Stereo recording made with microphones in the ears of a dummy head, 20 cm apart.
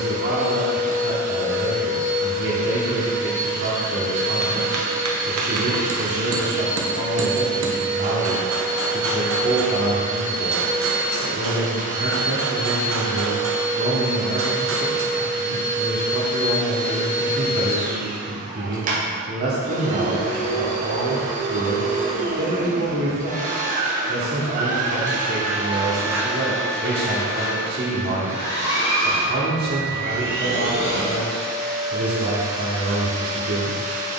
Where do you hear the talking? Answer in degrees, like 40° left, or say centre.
50° right.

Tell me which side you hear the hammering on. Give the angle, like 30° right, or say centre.
60° right.